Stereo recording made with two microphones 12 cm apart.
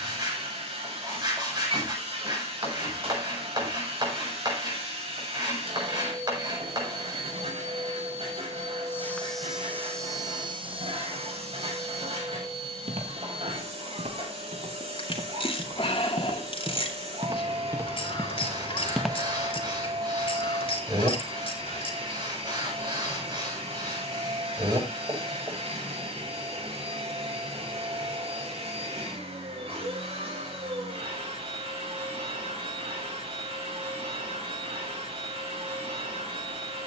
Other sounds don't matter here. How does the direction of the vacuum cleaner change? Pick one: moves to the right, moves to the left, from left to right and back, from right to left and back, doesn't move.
doesn't move.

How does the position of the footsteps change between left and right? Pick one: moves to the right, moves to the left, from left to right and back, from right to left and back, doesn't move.
from left to right and back.